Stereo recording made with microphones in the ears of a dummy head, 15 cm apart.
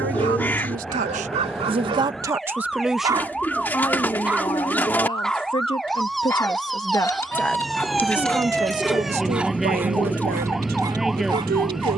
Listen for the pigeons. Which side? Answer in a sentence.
In this clip you hear the pigeons in the centre.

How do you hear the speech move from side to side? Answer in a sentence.
You can hear the speech go left and come back.